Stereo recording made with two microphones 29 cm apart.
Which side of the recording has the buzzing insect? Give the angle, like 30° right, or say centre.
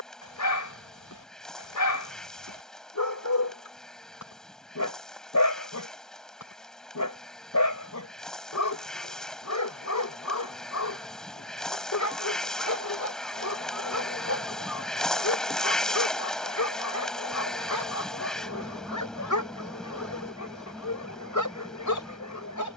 centre.